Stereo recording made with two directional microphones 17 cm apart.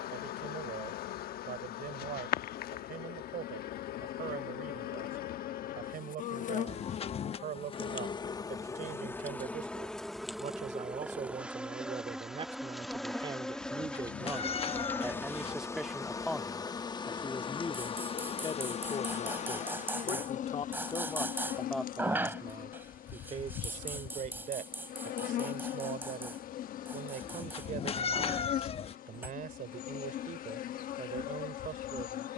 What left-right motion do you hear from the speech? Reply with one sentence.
In this clip you hear the speech go left and come back.